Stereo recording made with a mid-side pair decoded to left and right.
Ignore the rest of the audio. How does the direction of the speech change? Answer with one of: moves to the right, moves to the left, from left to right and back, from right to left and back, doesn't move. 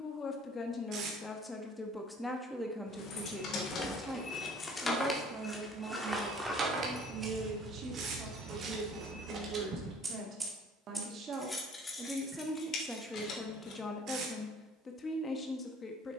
from left to right and back.